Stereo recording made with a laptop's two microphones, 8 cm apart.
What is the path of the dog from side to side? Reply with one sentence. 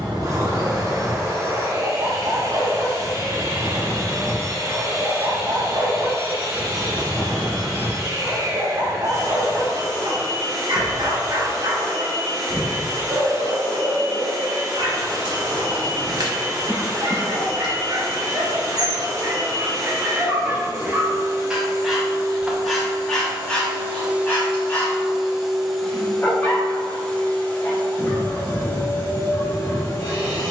You can hear the dog travel towards the left.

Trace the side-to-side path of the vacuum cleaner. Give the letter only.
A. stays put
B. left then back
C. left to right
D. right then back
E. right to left
E.